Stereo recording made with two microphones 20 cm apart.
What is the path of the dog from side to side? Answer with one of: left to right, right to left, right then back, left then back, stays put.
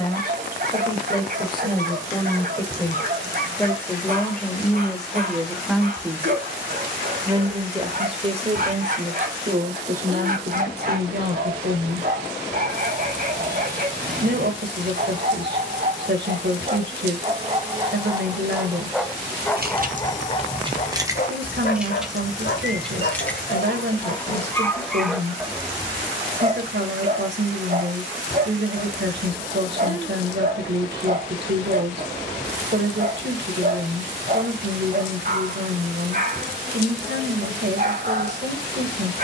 left then back.